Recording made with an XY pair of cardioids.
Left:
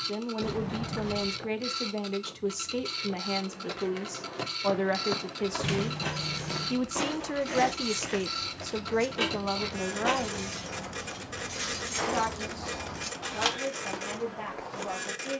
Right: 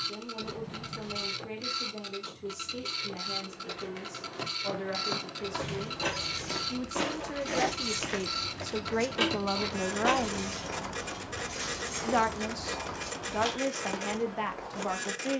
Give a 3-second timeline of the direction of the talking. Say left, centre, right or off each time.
left, left, left, centre, right.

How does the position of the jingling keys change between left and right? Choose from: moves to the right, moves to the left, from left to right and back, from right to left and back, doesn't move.
moves to the left.